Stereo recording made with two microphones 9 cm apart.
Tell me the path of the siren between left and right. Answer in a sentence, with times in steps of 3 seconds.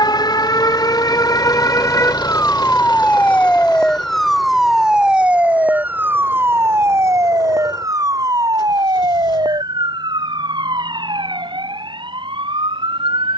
In this clip you hear the siren on the left from 0 s, in the centre from 3 s and on the right from 6 s.